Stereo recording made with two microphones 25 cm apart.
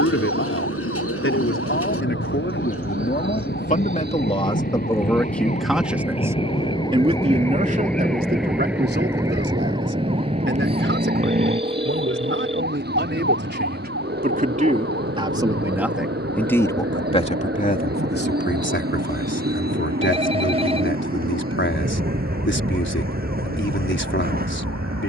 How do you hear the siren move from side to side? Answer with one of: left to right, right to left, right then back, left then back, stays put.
left to right.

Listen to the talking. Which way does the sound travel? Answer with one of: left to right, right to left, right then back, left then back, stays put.
right then back.